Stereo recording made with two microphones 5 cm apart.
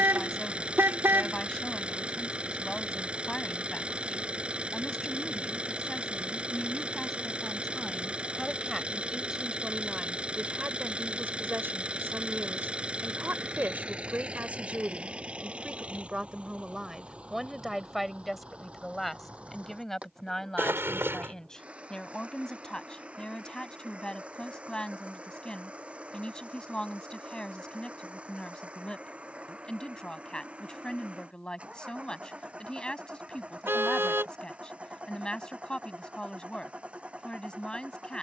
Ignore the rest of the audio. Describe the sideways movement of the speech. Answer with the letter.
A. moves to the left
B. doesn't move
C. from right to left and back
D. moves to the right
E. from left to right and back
E.